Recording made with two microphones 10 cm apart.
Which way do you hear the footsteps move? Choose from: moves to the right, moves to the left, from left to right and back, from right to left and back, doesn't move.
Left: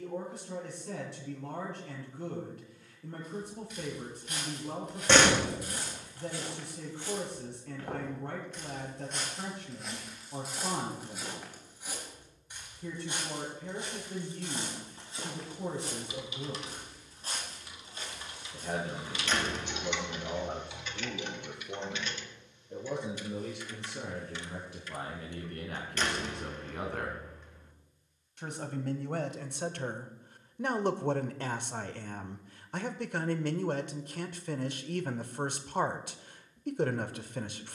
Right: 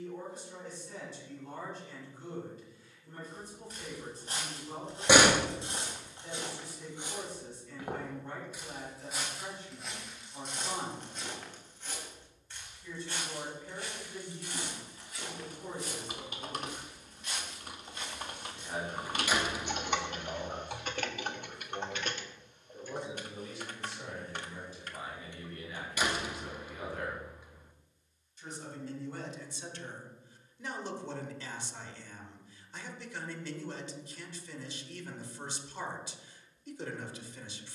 moves to the left.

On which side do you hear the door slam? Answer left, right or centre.
centre.